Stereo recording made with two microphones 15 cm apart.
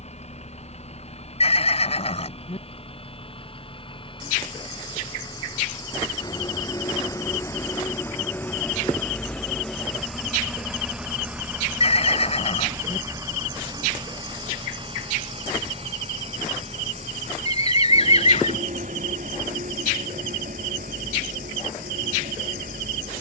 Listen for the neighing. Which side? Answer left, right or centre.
left.